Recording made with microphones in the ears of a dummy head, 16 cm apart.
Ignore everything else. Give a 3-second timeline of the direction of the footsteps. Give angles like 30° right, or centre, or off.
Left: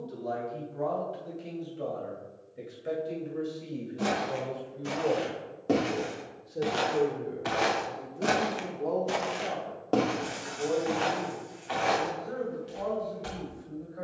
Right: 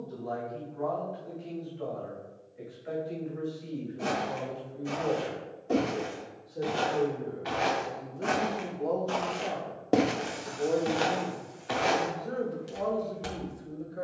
off, 80° left, 60° left, 20° right, 60° right.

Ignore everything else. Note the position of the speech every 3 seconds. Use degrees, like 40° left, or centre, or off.
50° left, 40° left, 10° left, 20° right, 50° right.